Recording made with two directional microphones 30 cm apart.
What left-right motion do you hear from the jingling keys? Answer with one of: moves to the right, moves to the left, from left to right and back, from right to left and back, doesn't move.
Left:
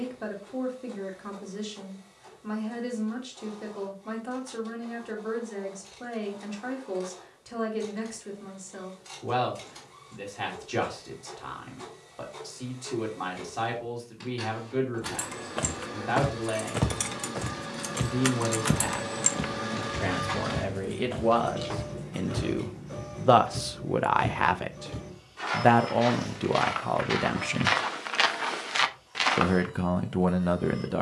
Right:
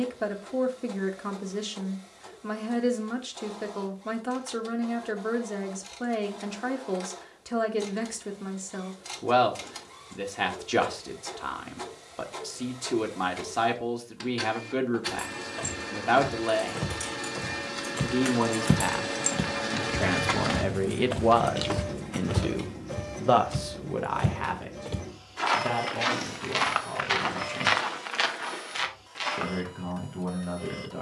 moves to the right.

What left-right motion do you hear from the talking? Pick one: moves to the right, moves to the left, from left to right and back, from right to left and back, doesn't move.
moves to the left.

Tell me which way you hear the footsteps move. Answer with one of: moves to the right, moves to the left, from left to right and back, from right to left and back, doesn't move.
from left to right and back.